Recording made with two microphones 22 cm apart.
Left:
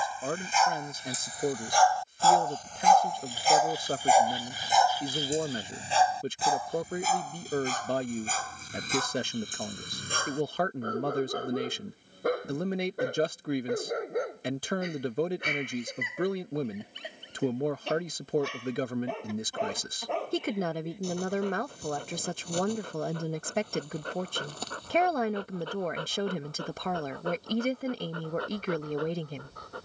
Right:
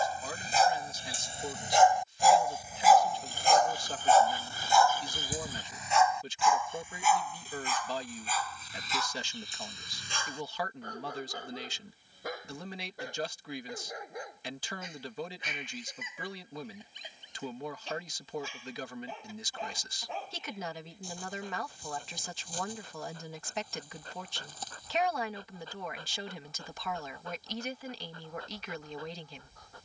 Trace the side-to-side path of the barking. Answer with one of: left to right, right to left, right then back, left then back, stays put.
right to left.